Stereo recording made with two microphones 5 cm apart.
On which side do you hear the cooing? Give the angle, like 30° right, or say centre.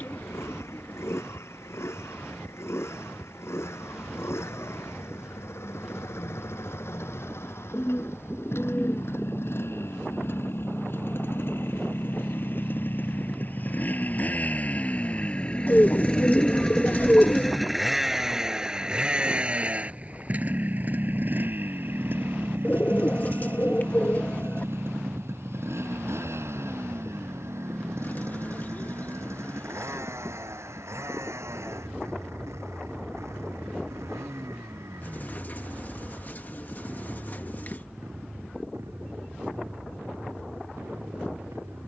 40° left.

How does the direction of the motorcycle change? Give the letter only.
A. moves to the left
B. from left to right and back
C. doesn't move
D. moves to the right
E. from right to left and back
D.